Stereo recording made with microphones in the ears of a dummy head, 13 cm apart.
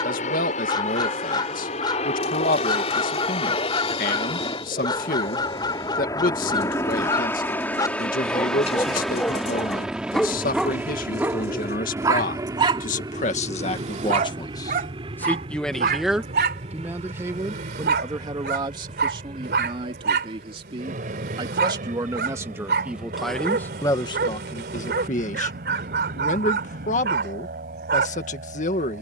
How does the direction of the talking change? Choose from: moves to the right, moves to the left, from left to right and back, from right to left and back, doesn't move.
from left to right and back.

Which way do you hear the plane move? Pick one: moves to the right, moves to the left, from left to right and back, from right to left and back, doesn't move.
moves to the right.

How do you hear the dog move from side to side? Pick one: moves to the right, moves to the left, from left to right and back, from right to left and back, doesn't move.
moves to the right.